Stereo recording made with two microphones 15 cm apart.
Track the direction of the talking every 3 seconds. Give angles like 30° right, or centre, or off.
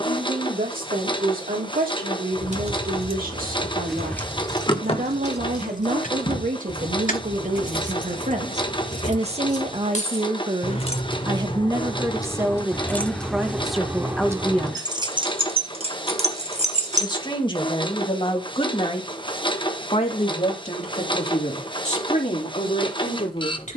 80° right, 70° right, 60° right, 40° right, centre, 30° left, 40° left, 50° left.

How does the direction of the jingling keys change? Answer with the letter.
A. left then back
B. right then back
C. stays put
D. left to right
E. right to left
A.